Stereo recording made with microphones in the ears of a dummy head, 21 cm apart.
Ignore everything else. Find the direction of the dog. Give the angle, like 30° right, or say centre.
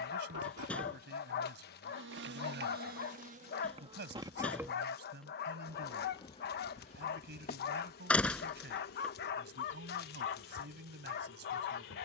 50° left.